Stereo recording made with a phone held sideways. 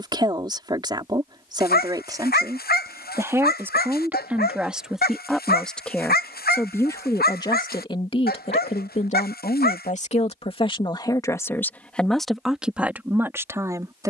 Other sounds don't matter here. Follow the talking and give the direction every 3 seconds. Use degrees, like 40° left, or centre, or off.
20° right, 10° right, 30° left, 30° left, 10° right.